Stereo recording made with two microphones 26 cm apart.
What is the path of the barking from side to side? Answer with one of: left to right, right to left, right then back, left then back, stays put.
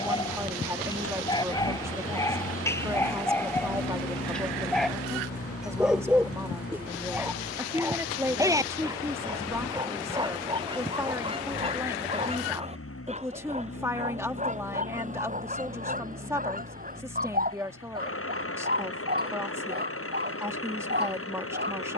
left to right.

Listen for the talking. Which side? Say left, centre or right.
centre.